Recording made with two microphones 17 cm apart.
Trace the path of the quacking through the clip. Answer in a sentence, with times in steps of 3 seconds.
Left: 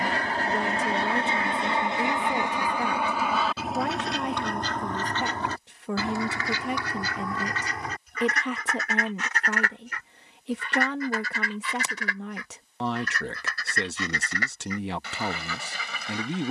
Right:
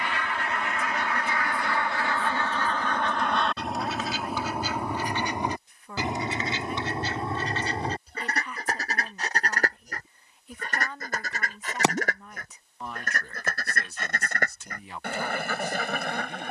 You can hear the quacking on the left from 0 s, in the centre from 3 s and on the right from 6 s.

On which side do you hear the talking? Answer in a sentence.
You can hear the talking on the left.